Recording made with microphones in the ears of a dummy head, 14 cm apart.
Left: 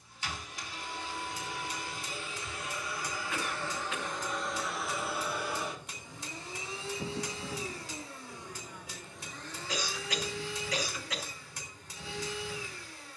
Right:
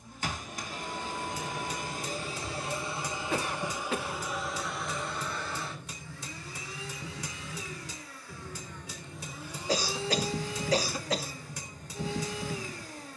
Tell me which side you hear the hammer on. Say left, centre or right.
right.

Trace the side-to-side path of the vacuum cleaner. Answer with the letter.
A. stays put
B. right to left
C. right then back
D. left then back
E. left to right
D.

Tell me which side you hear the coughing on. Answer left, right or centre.
right.